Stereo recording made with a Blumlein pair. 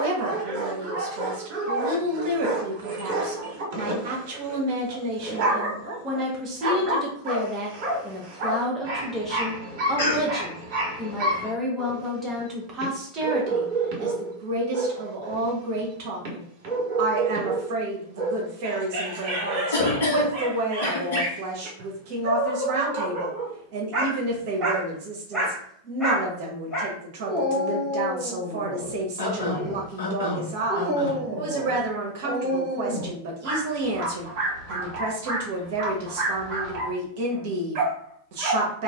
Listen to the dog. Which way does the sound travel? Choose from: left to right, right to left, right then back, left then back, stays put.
left then back.